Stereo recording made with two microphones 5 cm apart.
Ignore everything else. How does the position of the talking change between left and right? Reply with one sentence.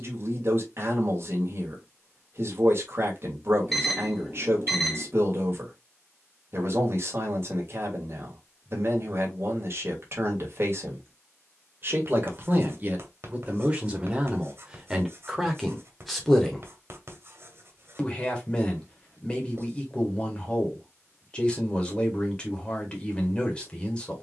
In this clip you hear the talking move from right to left.